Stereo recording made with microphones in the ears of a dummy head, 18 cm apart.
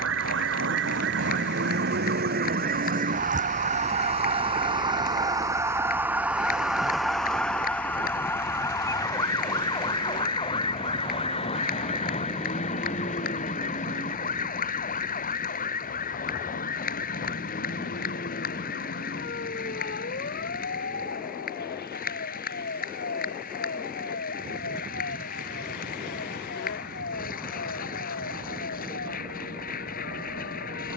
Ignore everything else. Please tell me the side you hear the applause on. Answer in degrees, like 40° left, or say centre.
50° left.